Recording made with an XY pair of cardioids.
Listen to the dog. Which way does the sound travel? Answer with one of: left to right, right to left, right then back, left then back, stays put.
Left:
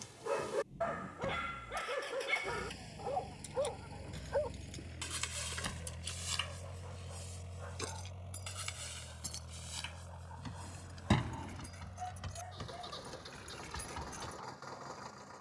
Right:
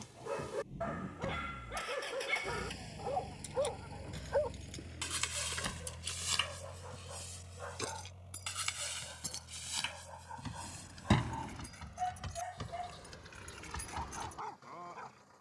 left to right.